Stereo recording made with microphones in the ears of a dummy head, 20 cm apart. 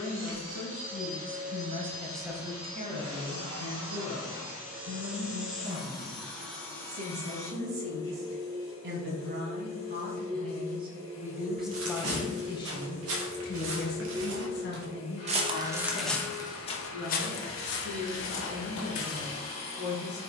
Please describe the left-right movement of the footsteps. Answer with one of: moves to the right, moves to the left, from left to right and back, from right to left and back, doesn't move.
moves to the left.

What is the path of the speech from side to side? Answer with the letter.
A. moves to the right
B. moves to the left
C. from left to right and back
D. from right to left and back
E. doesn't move
C.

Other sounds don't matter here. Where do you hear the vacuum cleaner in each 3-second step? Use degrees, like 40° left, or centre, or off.
30° right, 10° right, 10° left, 30° left, 30° left, 30° left, 30° left.